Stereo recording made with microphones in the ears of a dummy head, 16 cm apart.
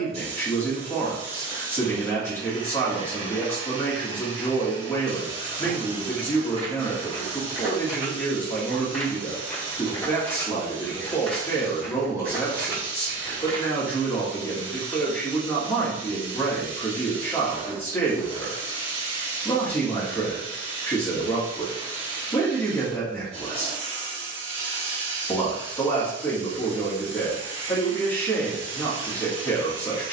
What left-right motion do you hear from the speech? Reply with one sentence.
In this clip you hear the speech stay put.